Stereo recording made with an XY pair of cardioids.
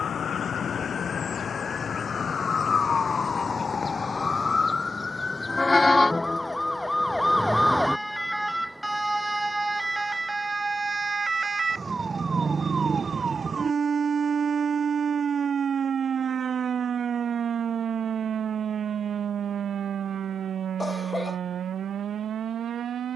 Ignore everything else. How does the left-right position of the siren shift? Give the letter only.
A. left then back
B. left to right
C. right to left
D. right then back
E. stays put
B.